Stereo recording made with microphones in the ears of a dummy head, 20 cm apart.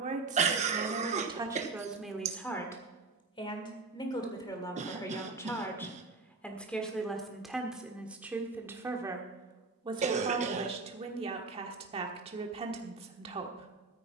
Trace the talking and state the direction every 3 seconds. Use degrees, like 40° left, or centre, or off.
10° right, 20° left, centre, 20° right, 30° right.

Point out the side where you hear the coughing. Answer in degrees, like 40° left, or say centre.
30° right.